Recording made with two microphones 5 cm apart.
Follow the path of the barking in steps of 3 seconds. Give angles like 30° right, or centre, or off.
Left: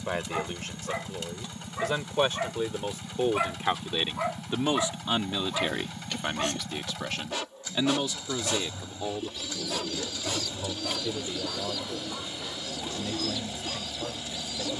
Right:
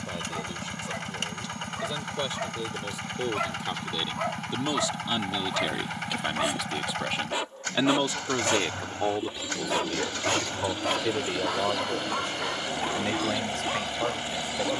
20° left, centre, 20° right, 50° right, 70° right.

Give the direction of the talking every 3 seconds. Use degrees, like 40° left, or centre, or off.
50° left, 30° left, 20° right, 60° right, 70° right.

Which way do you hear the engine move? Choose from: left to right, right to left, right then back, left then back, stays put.
stays put.